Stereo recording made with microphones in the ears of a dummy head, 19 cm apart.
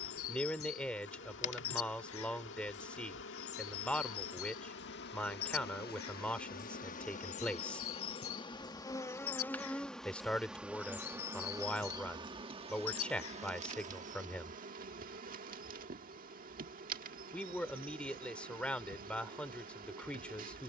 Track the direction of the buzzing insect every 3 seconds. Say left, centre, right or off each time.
left, left, left, centre, right, right, right.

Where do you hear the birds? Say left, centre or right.
left.